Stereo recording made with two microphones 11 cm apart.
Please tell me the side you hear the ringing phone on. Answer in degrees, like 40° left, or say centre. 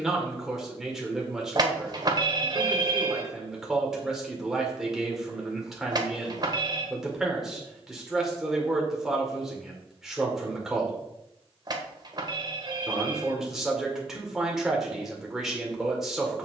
40° right.